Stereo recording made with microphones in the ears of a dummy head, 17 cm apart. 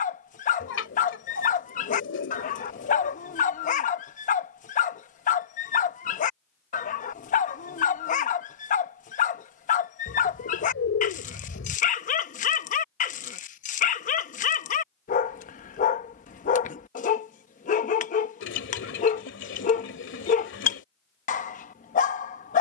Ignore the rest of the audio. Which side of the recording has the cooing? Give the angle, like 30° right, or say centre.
70° left.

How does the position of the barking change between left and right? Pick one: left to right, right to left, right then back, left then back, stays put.
stays put.